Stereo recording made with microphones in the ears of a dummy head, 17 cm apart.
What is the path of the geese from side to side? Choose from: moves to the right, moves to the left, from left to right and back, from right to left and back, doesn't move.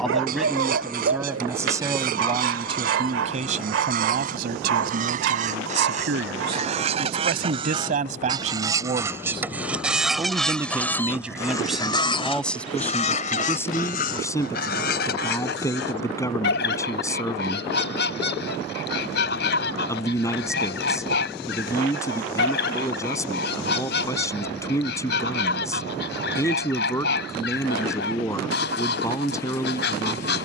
moves to the left.